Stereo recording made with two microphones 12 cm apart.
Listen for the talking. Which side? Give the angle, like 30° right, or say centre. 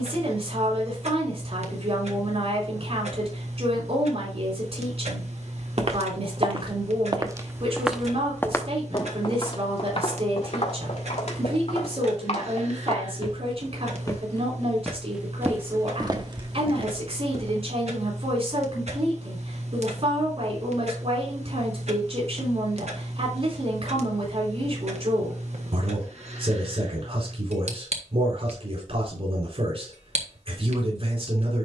50° right.